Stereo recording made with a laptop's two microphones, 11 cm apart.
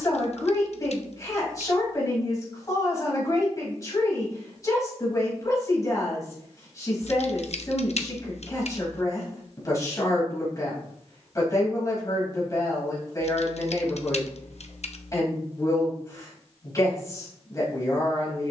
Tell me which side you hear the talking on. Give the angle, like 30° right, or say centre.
30° left.